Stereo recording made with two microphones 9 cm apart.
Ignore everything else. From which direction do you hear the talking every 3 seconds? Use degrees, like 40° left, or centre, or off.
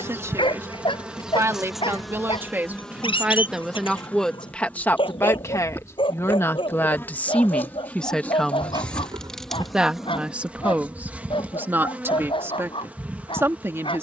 30° right, 10° left, 20° left, 20° right, 30° right.